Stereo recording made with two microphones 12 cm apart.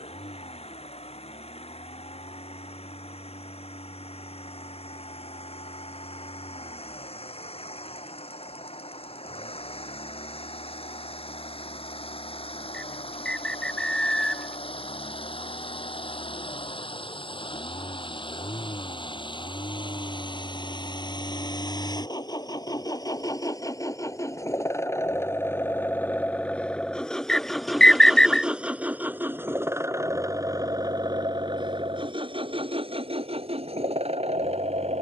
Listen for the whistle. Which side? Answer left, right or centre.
centre.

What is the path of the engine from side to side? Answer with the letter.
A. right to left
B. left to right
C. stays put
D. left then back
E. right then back
B.